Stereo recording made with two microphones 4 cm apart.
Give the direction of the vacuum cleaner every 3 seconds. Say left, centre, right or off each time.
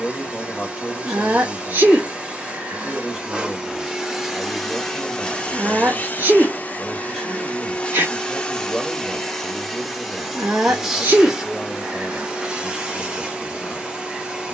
right, centre, left, centre, right.